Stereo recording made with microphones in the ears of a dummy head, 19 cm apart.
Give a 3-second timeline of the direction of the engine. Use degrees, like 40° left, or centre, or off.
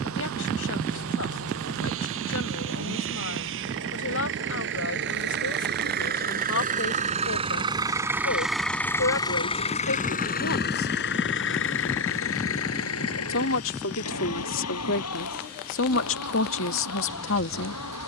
70° right, 60° right, 20° right, 40° left, 70° left, 80° left.